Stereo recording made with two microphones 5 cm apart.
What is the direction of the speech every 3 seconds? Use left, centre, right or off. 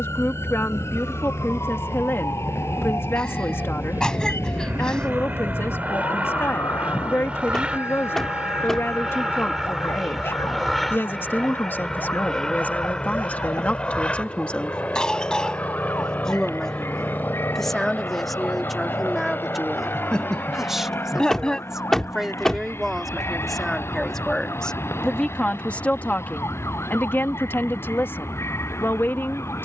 left, left, left, left, left, centre, centre, centre, left, left.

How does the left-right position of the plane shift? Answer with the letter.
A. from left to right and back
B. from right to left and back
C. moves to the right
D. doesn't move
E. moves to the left
E.